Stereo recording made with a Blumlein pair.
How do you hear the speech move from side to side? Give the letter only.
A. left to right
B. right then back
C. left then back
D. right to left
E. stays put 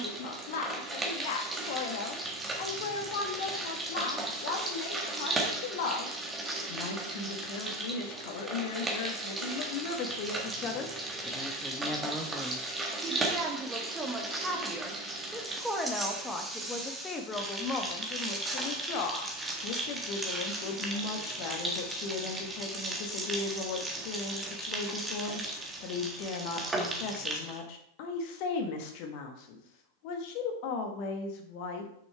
B.